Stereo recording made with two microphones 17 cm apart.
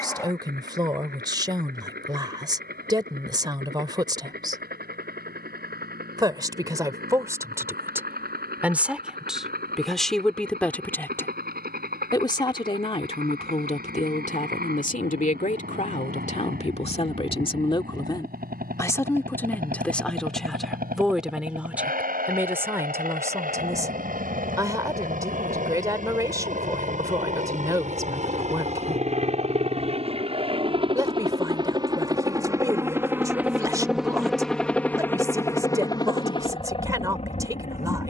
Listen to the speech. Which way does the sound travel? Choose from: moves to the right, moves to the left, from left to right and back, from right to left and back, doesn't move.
from right to left and back.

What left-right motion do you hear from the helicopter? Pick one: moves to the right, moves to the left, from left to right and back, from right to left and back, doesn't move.
moves to the left.